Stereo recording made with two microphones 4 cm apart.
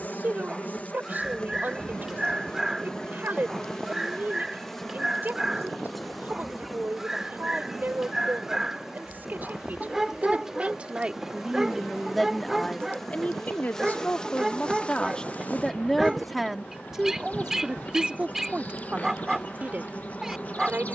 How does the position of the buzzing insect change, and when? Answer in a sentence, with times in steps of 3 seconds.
In this clip you hear the buzzing insect on the left from 0 s, in the centre from 3 s and on the left from 15 s.